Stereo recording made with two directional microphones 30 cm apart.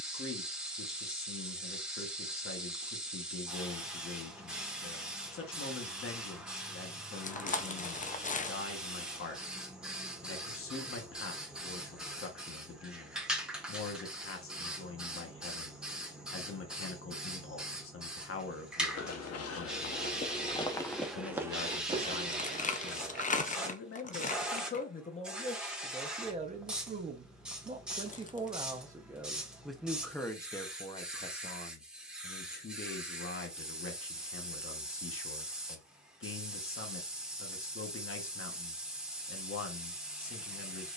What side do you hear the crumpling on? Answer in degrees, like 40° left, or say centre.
30° left.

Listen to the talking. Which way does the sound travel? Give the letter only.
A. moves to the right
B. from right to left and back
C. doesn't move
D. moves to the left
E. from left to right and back
E.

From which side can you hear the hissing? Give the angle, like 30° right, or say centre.
centre.